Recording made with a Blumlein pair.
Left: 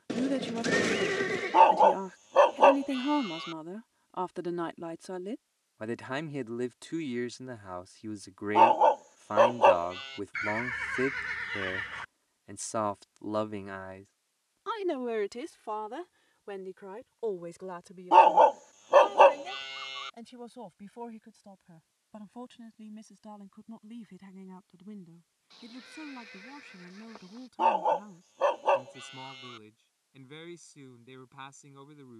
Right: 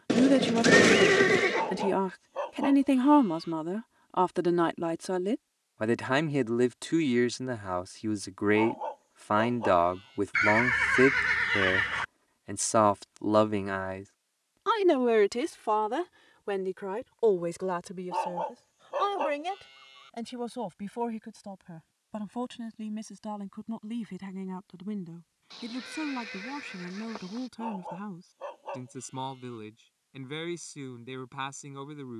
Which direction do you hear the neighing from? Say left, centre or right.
right.